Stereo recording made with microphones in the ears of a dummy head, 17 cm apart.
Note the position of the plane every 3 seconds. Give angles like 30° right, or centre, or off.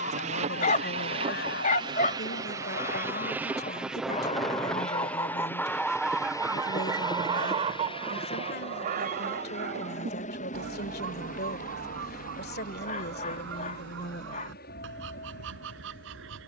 30° right, centre, 20° left, 40° left, 50° left, 50° left.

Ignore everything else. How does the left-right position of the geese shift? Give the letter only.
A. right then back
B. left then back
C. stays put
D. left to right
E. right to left
D.